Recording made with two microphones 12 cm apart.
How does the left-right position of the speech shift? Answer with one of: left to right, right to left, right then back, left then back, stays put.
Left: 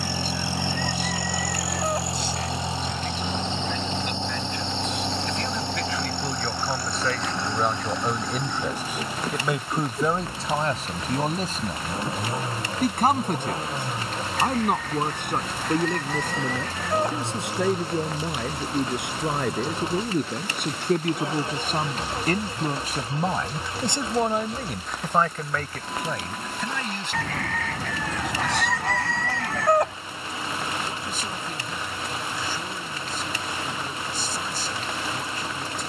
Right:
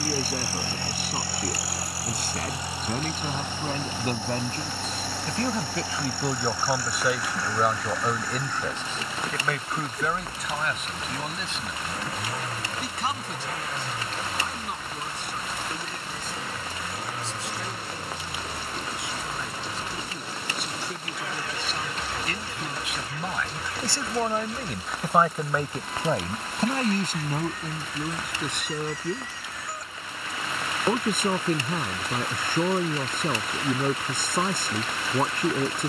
left then back.